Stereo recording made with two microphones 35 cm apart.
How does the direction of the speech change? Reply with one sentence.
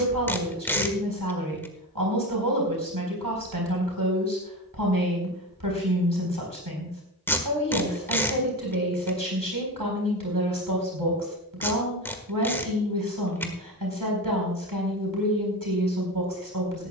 You can hear the speech stay put.